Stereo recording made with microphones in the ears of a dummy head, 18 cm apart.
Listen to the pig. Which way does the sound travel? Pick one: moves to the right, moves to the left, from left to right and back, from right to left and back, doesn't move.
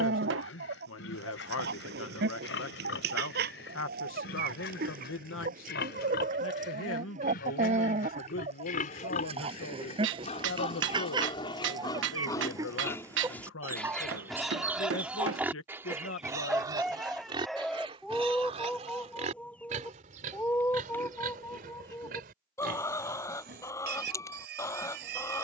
moves to the right.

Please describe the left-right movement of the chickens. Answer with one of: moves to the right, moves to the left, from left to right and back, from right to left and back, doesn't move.
moves to the left.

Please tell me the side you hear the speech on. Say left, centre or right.
left.